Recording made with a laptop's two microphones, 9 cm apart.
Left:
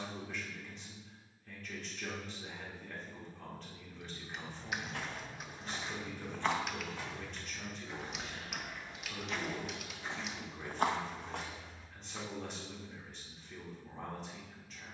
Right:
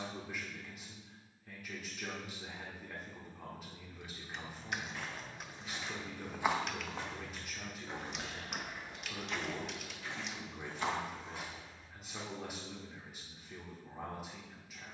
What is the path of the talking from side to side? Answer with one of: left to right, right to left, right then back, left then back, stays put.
stays put.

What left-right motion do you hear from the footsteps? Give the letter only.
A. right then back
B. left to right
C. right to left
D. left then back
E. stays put
A.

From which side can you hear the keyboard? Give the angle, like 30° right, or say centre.
centre.